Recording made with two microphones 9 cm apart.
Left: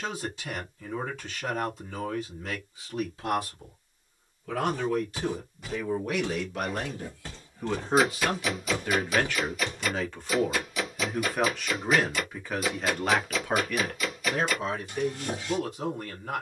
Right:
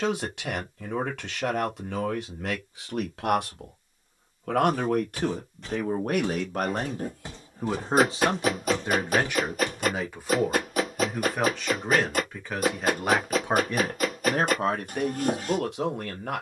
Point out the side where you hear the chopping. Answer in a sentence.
In this clip you hear the chopping on the right.